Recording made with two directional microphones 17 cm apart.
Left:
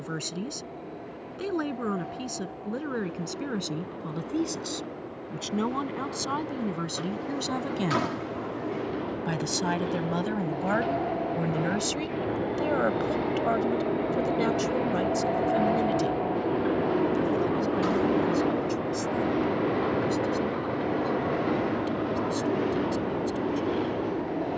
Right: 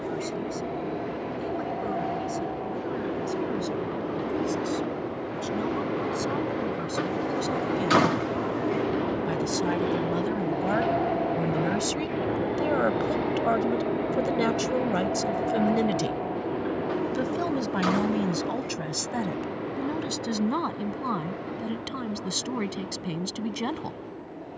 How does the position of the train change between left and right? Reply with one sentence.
You can hear the train move from right to left.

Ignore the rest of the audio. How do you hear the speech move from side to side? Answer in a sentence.
You can hear the speech go from the left side to the right.